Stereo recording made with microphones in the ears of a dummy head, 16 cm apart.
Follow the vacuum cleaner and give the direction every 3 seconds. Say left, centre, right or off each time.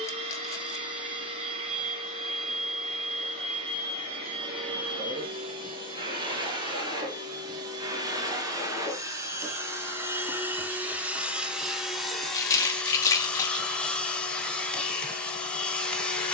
right, right, right, centre, centre, centre.